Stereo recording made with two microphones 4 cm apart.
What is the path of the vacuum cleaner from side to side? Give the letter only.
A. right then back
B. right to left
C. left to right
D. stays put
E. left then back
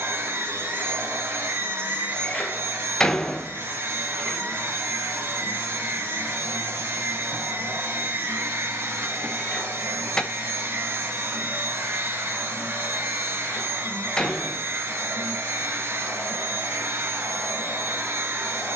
D.